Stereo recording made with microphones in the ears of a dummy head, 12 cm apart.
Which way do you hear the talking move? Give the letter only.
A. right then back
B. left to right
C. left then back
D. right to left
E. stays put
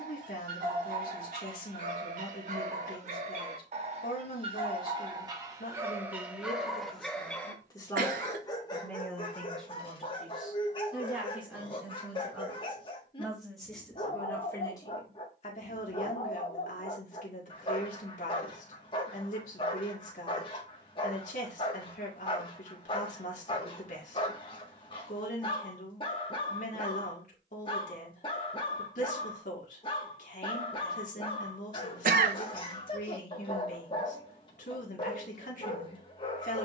A.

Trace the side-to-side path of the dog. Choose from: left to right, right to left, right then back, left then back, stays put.
right to left.